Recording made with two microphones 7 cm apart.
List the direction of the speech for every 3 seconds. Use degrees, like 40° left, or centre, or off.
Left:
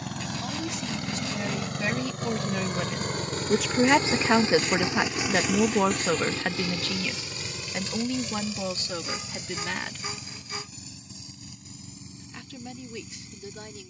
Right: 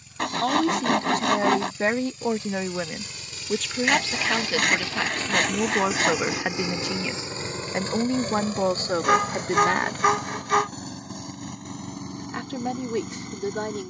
40° right, 10° left, 30° right, 50° right, 60° right.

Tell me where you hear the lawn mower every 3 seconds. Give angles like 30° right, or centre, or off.
70° left, 30° left, 30° right, 60° right, 60° right.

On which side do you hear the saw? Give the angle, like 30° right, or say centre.
70° right.